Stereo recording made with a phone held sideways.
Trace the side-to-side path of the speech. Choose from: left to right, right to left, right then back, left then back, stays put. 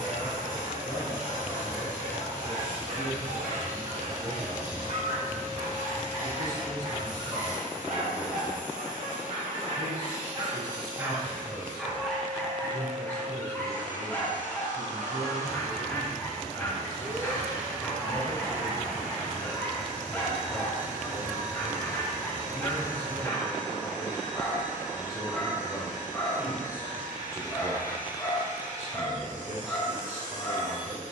left to right.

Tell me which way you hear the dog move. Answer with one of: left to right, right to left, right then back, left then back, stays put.
right to left.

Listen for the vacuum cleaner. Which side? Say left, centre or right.
right.